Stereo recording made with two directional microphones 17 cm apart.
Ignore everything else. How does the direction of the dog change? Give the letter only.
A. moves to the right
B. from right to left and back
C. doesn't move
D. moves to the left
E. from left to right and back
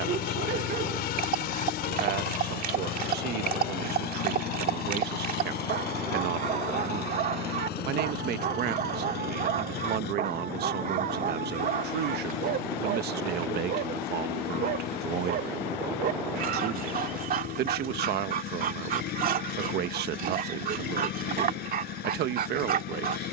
C.